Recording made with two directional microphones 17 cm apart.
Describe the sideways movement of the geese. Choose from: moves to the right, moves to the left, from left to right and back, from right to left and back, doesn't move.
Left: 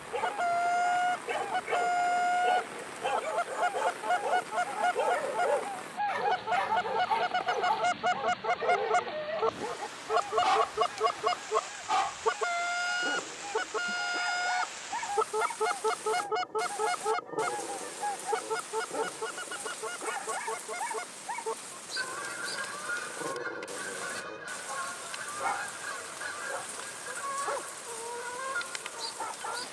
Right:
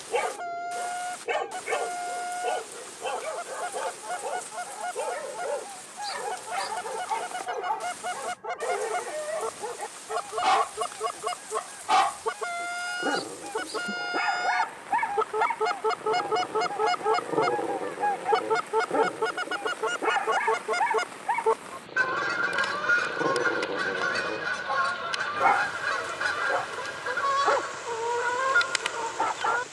moves to the right.